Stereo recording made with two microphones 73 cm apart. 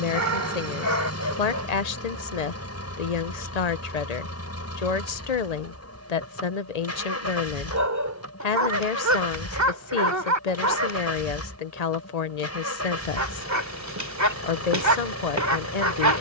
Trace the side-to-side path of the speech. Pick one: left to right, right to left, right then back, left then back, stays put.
stays put.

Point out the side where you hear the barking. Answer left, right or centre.
right.